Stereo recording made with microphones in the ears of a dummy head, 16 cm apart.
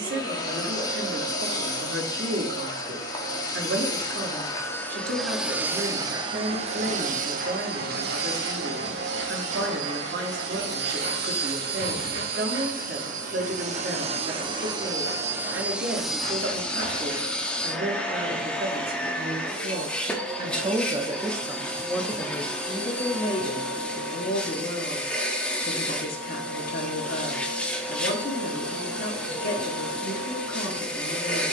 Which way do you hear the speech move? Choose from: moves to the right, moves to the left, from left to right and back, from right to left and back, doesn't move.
moves to the left.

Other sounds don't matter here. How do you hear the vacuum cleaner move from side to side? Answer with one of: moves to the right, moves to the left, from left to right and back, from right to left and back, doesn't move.
from left to right and back.